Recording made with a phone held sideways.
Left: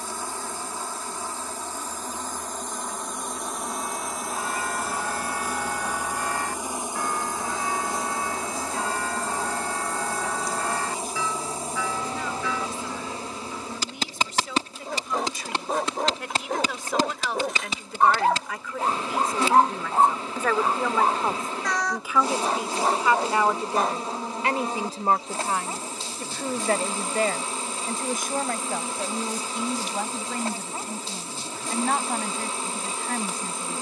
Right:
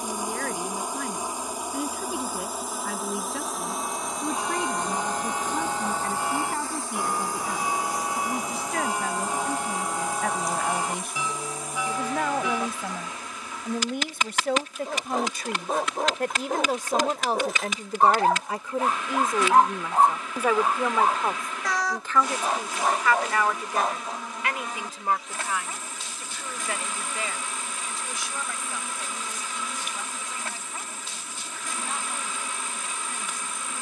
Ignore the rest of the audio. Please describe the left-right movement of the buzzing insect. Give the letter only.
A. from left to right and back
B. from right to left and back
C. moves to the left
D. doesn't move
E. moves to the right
C.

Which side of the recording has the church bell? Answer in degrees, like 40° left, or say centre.
20° right.